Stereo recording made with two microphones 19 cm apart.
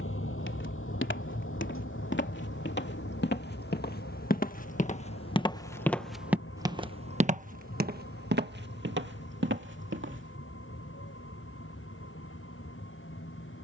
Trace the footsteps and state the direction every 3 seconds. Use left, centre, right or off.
left, left, right, right, off.